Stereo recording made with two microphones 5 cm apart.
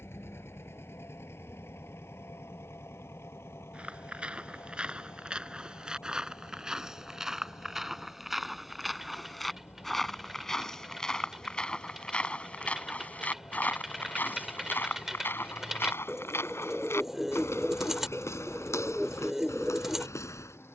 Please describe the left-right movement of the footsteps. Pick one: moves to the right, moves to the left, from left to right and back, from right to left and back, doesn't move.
moves to the left.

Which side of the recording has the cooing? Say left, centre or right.
centre.